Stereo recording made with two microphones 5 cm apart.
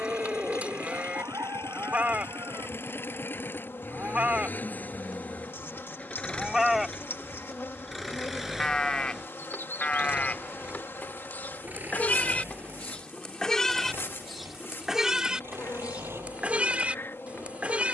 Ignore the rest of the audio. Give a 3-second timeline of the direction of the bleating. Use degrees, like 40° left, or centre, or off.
30° right, 20° right, centre, 30° left, 10° left, 20° right.